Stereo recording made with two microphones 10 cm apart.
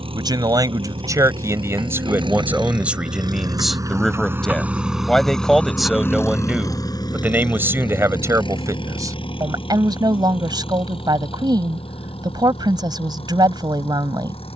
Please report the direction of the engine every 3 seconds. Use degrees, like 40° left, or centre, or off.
60° right, 20° right, 50° left, 70° left, 70° left.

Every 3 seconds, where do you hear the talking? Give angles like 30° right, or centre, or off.
30° right, centre, 20° right, 50° right, 50° right.